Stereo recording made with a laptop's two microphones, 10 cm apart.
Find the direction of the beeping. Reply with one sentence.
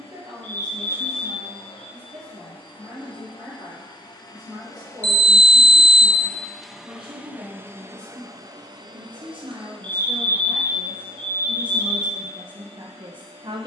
In this clip you hear the beeping in the centre.